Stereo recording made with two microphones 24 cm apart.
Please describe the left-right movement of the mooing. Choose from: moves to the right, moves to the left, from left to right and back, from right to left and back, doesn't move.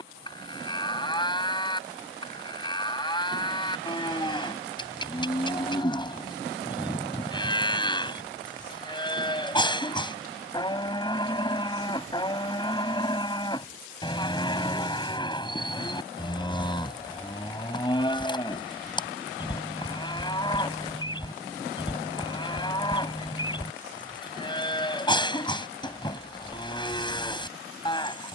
doesn't move.